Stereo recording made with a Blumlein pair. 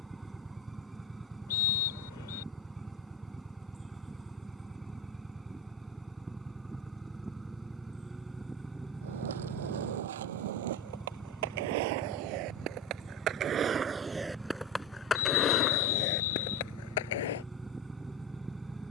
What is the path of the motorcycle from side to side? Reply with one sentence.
In this clip you hear the motorcycle stay in one place.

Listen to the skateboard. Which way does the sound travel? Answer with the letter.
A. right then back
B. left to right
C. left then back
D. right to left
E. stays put
D.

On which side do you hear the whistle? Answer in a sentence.
You can hear the whistle on the left.